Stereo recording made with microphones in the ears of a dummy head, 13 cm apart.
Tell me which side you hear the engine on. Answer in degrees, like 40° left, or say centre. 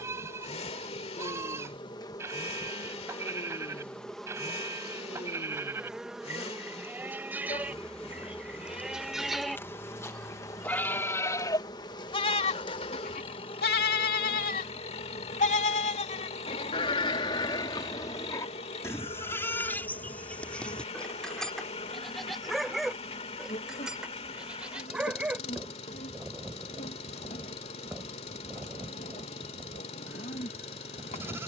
40° left.